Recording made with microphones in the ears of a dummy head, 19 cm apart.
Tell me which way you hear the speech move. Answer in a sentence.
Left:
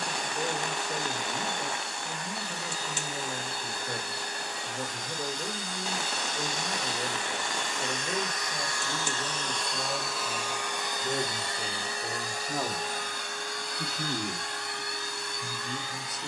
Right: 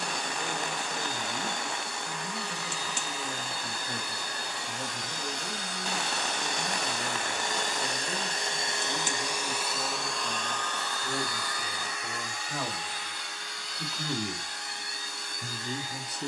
In this clip you hear the speech go from the left side to the right.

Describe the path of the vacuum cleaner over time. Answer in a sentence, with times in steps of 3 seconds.
You can hear the vacuum cleaner on the right from 0 s, in the centre from 9 s and on the left from 12 s.